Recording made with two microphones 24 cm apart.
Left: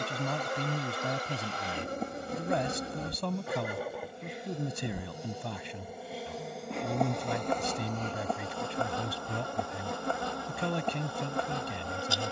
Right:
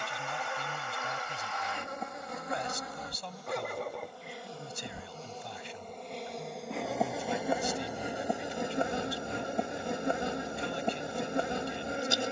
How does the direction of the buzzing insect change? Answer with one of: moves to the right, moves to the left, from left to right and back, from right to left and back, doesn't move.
moves to the right.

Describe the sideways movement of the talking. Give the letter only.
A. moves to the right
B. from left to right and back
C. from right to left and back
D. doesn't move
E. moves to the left
D.